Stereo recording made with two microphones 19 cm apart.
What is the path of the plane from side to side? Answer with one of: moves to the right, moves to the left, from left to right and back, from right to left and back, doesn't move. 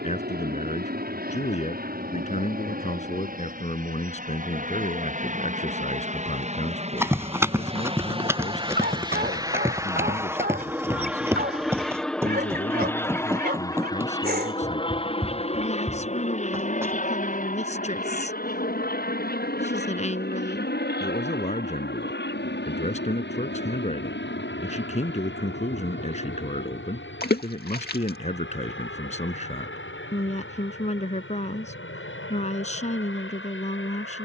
moves to the left.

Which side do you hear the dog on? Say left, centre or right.
right.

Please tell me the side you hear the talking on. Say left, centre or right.
left.